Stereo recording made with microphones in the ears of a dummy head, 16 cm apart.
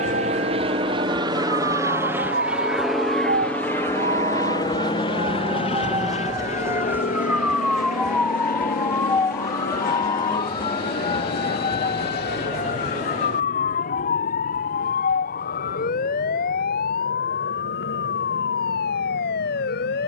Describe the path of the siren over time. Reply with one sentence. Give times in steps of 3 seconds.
In this clip you hear the siren on the right from 0 s, in the centre from 6 s and on the left from 9 s.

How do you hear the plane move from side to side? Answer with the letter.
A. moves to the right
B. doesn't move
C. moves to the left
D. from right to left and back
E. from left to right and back
C.